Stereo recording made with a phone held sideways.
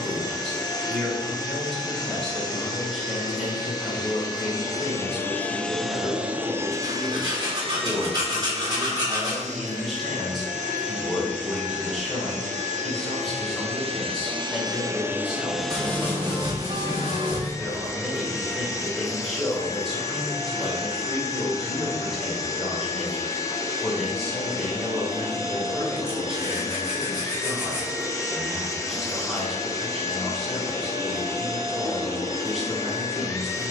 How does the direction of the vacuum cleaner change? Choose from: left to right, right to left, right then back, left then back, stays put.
right then back.